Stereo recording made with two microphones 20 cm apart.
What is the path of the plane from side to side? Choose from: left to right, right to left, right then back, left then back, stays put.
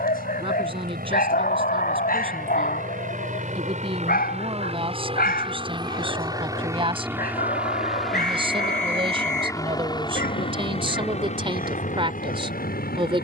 right to left.